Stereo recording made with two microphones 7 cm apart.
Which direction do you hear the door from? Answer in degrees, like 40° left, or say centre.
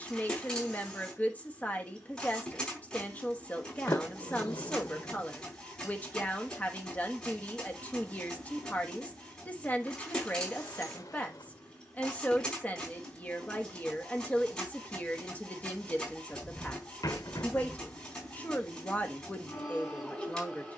60° left.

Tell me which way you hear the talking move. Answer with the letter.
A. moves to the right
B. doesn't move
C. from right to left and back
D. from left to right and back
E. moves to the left
B.